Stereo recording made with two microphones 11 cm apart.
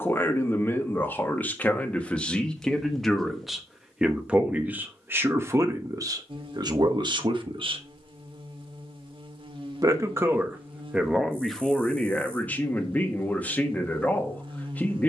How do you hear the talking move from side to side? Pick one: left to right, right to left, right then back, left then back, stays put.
right then back.